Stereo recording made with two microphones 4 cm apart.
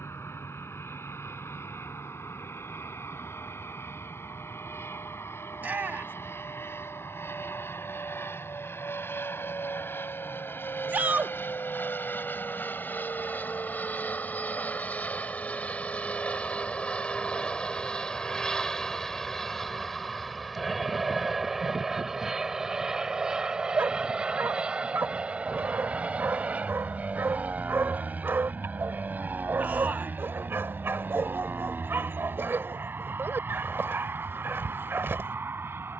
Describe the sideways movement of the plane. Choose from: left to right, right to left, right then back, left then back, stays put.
left to right.